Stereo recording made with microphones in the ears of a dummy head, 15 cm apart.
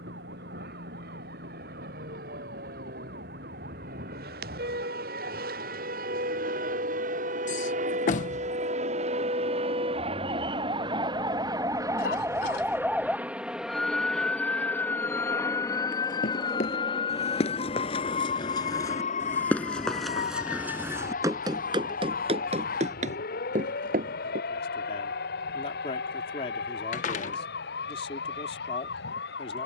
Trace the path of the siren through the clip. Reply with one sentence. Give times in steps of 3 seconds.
In this clip you hear the siren on the right from 0 s, in the centre from 12 s and on the left from 15 s.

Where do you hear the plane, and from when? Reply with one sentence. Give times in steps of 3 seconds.
You can hear the plane on the right from 0 s, in the centre from 12 s and on the left from 15 s.